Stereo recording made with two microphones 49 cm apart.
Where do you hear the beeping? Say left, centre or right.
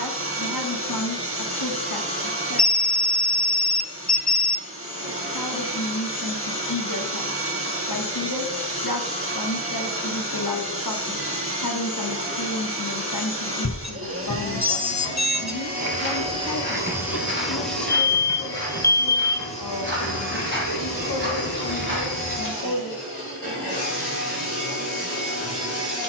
left.